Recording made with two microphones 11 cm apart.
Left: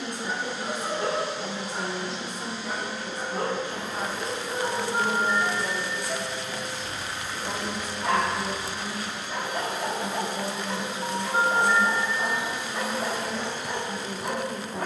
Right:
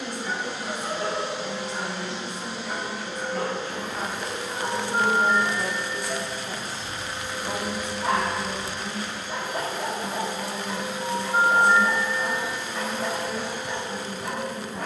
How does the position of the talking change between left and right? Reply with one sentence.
You can hear the talking move from left to right and back again.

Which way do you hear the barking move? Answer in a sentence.
In this clip you hear the barking move from left to right and back again.